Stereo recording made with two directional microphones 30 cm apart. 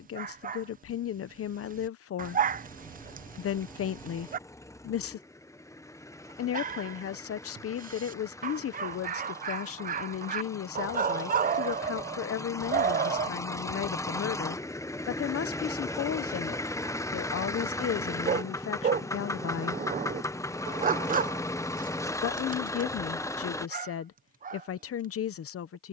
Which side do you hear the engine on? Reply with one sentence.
In this clip you hear the engine in the centre.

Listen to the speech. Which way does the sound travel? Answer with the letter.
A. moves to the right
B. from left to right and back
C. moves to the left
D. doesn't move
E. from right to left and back
D.